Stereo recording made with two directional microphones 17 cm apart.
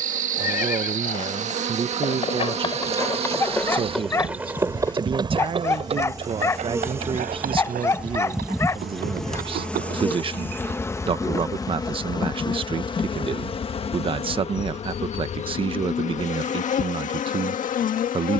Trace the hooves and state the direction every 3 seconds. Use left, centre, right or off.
left, centre, right, right, off, off.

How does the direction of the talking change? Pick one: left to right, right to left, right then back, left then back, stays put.
stays put.